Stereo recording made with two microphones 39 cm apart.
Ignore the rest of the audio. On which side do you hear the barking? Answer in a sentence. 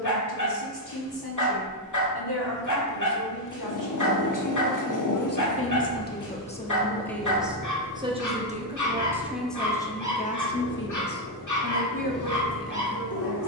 In this clip you hear the barking on the left.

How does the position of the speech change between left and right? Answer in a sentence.
You can hear the speech move from left to right and back again.